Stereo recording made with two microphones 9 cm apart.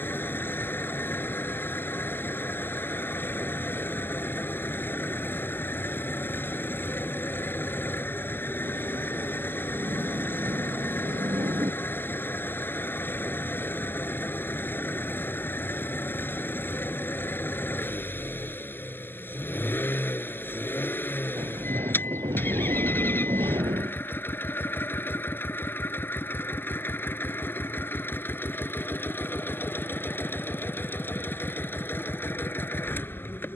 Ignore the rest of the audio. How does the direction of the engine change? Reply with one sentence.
In this clip you hear the engine stay put.